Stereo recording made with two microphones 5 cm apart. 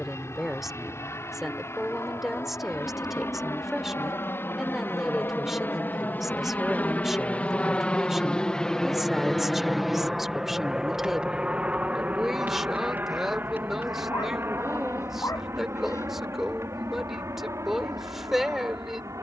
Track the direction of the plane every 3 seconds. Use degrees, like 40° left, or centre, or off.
60° left, 50° left, 30° left, 10° right, 40° right, 50° right, 60° right.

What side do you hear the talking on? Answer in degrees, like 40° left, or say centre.
centre.